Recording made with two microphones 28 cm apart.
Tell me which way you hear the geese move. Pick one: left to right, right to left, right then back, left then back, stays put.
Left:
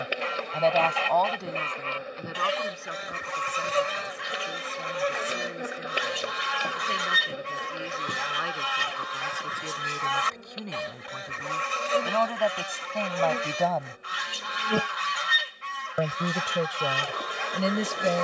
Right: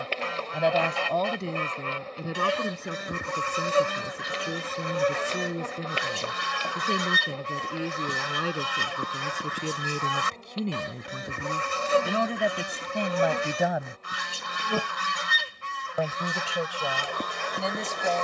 stays put.